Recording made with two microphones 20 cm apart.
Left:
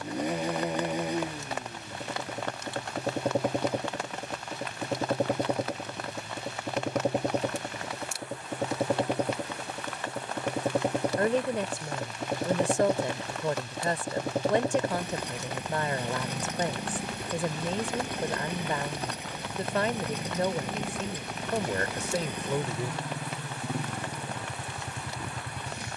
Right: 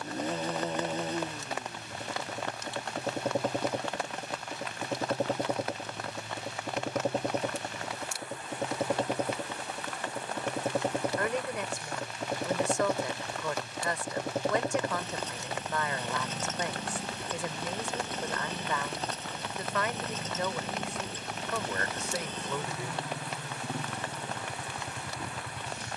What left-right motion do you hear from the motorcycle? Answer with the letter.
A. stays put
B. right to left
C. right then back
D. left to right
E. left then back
A.